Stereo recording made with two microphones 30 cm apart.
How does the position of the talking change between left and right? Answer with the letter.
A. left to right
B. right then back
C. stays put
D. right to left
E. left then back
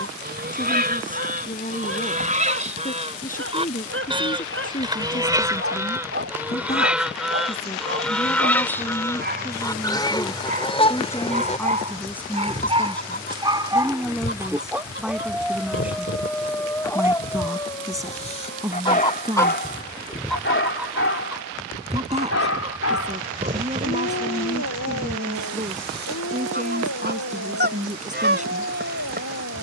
A.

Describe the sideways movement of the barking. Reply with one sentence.
You can hear the barking travel towards the left.